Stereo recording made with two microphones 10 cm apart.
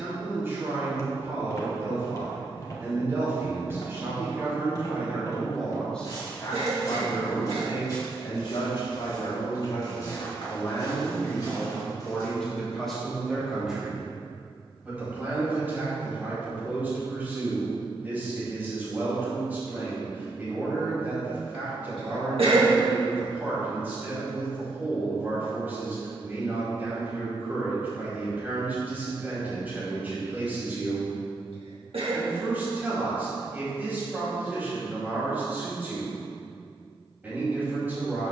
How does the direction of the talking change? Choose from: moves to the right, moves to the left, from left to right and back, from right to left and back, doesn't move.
from right to left and back.